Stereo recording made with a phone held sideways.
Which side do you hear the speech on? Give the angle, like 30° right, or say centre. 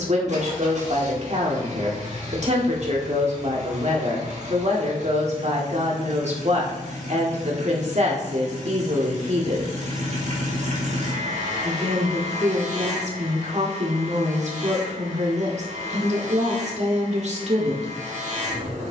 50° right.